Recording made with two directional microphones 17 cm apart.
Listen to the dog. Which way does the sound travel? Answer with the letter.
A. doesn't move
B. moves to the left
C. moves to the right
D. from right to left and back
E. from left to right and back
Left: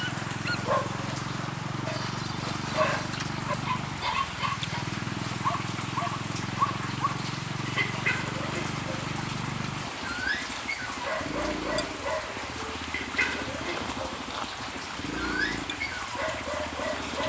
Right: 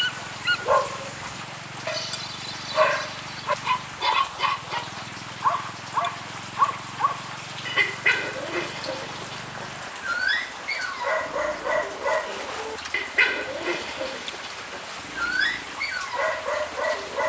A.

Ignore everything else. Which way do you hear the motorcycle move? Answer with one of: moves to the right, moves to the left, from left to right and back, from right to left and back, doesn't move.
doesn't move.